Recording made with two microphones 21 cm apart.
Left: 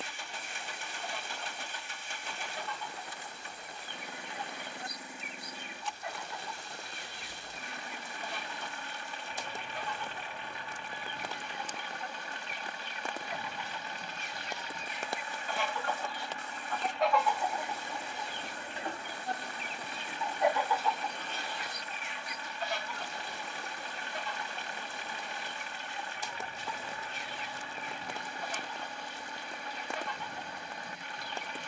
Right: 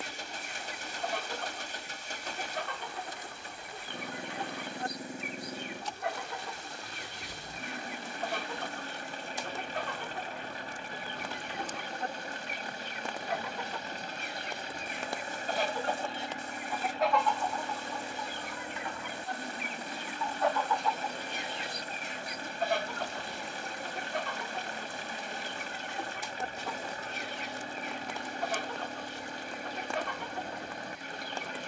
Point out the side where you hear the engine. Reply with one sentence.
In this clip you hear the engine on the right.